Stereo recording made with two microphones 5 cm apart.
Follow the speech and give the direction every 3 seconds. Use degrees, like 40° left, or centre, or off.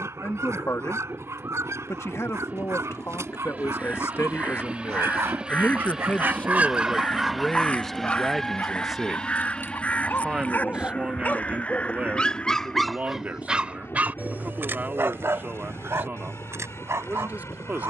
70° left, 60° left, 10° left, 20° right, 40° right, 40° right.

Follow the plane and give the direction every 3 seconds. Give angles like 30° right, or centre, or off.
40° right, 30° right, centre, 30° left, 50° left, 60° left.